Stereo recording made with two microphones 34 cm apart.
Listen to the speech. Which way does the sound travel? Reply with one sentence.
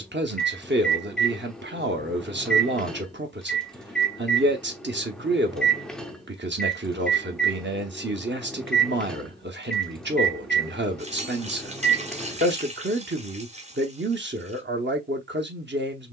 In this clip you hear the speech stay put.